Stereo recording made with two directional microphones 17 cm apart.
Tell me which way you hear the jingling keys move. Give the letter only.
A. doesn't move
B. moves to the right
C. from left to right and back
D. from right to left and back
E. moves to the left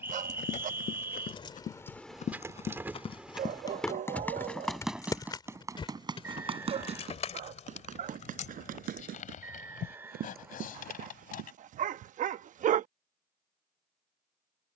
C.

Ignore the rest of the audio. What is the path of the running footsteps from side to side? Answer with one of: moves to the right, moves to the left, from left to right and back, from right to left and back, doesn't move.
moves to the right.